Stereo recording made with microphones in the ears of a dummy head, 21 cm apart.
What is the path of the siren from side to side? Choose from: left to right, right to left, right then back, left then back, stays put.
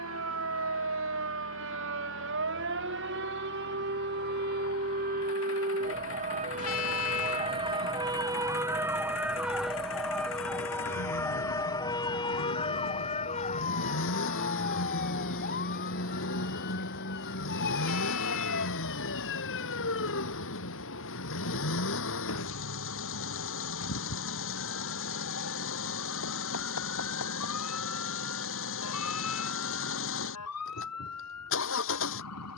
right to left.